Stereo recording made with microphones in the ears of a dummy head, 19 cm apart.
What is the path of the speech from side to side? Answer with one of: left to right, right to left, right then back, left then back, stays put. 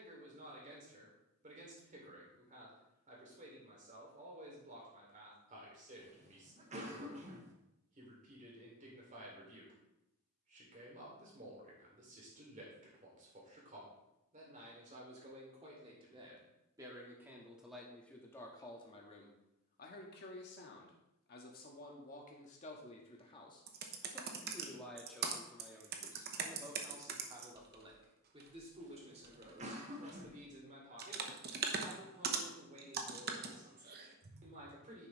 left then back.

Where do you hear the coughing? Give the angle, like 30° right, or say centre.
30° right.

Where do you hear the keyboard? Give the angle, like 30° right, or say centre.
50° right.